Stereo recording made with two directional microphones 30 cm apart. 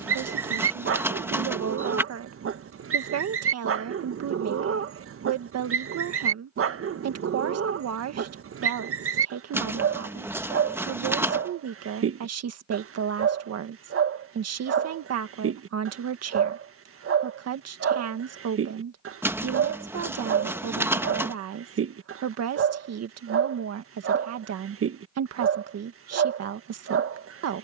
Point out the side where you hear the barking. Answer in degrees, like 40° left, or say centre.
50° right.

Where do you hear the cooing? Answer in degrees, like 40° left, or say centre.
10° right.